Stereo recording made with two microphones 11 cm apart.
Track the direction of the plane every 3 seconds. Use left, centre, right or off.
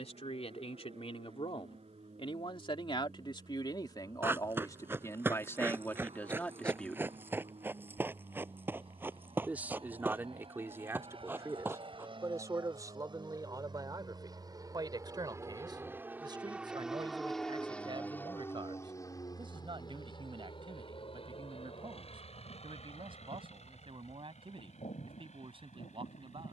right, right, right, right, right, centre, left, left, left.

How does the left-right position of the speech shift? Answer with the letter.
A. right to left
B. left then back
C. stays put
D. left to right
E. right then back
D.